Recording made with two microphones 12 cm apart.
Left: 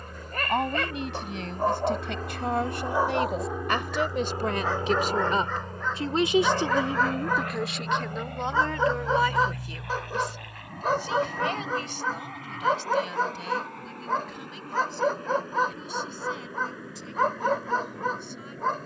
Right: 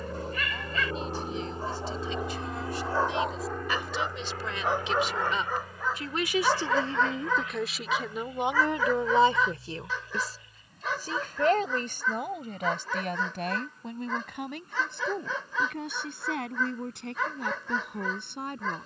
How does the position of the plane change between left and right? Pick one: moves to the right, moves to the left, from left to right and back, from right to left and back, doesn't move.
moves to the left.